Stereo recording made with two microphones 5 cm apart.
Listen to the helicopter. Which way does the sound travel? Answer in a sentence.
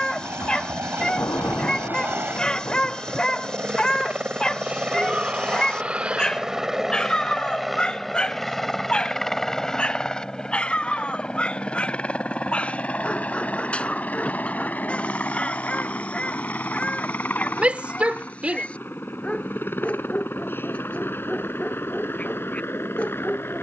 You can hear the helicopter go from the right side to the left.